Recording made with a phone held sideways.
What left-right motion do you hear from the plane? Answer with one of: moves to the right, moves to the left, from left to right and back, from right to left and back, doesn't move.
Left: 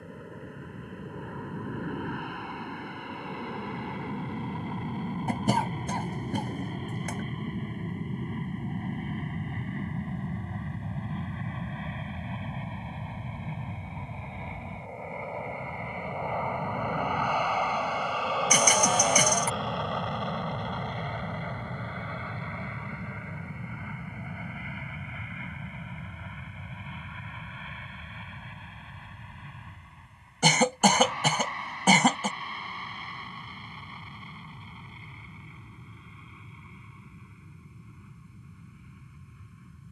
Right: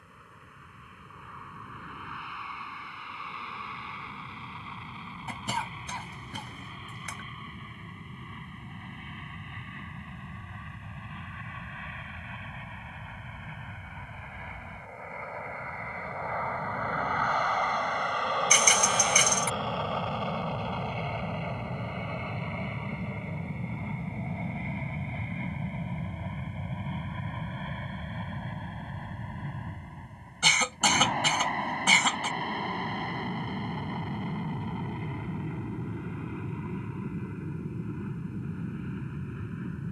moves to the right.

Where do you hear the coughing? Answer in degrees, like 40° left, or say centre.
50° left.